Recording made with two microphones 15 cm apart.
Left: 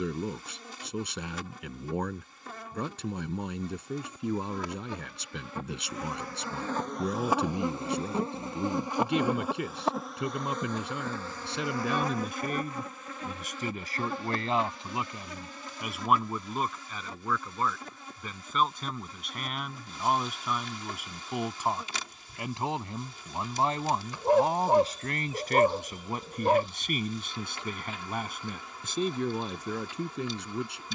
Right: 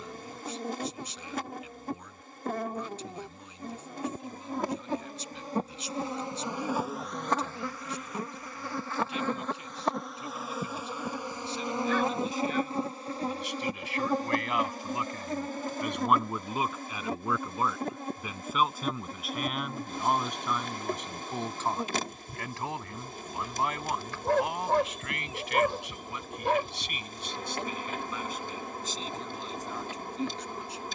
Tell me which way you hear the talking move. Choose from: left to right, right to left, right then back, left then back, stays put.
right then back.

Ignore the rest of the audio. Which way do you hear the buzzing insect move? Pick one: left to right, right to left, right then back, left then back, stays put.
left then back.